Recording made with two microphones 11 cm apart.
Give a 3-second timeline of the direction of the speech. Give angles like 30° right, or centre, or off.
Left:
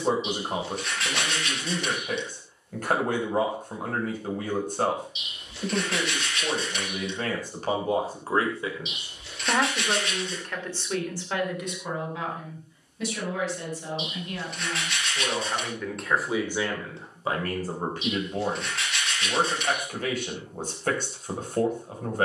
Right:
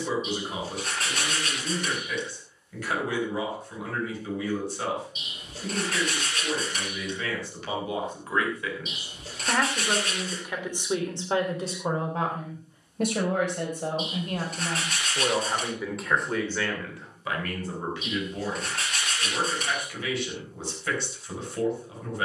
50° left, 50° left, 40° left, 10° right, 50° right, 10° left, 50° left, 50° left.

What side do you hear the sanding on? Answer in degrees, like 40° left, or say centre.
40° right.